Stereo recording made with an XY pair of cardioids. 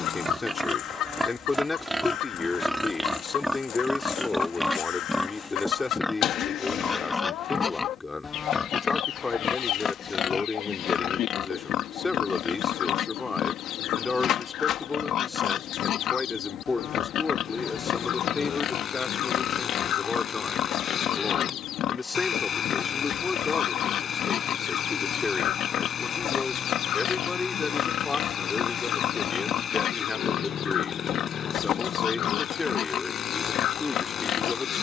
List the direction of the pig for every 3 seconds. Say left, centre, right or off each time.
centre, centre, left, left, left, left, left, left, left, left, left, left.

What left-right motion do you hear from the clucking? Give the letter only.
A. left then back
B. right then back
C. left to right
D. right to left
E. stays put
E.